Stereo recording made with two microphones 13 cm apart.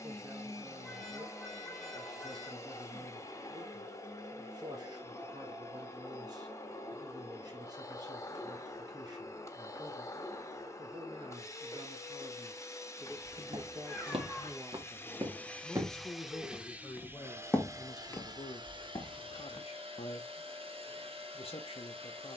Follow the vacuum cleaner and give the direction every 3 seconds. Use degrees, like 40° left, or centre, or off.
20° left, 20° left, 20° left, 20° left, 20° left, 10° right, 40° right, 50° right.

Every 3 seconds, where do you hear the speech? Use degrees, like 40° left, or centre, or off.
30° right, 30° right, 30° right, 30° right, 20° right, 10° left, 40° left, 50° left.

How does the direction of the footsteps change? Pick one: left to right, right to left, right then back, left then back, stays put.
right to left.